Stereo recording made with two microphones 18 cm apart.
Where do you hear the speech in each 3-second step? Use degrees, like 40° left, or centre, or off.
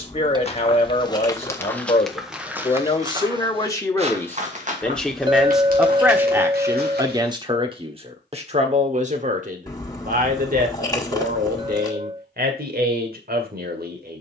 30° left, 10° left, 30° right, 50° right, 60° right.